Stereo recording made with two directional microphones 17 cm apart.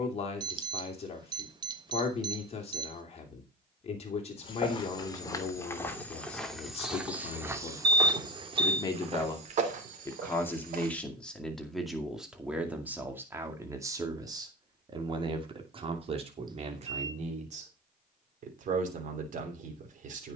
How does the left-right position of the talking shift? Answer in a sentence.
You can hear the talking move from left to right.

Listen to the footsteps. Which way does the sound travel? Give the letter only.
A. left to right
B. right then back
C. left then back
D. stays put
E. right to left
A.